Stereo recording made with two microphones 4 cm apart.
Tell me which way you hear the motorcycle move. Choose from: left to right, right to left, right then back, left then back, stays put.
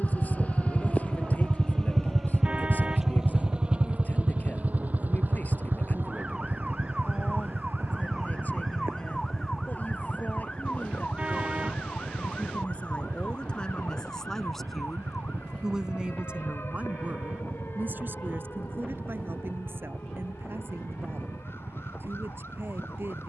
left to right.